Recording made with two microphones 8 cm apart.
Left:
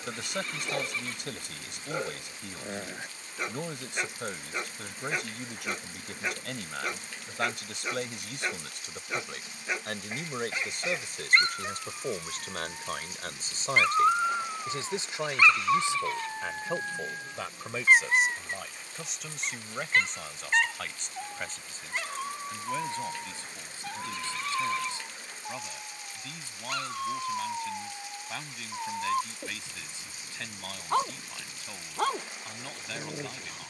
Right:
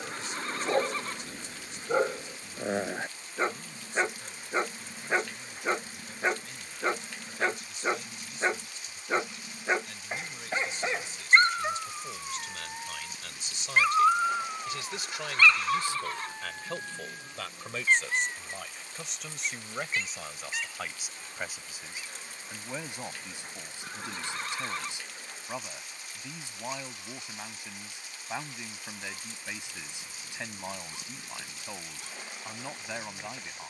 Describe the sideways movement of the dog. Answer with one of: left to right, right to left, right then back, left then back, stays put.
right to left.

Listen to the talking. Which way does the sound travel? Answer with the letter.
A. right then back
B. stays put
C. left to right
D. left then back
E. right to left
C.